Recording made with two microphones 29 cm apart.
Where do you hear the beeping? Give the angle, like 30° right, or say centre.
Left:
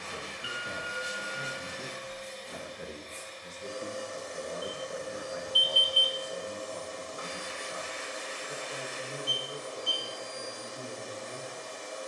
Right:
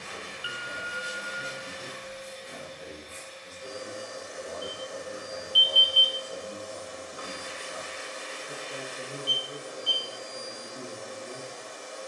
60° left.